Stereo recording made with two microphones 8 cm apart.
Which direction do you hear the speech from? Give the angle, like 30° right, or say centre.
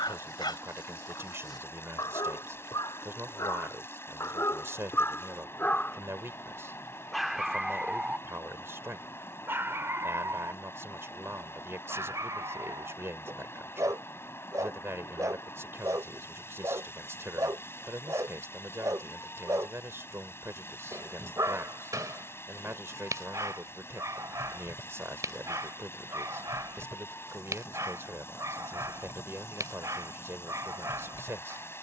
30° right.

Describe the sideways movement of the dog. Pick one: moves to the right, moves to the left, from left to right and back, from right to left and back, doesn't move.
moves to the right.